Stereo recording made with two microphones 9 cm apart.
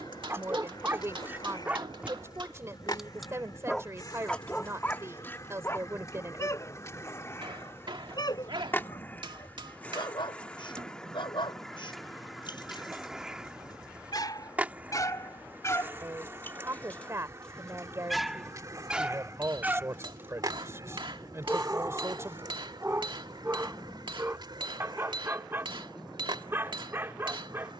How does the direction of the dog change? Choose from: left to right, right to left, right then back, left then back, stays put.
left then back.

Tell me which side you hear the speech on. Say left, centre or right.
right.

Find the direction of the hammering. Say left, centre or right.
right.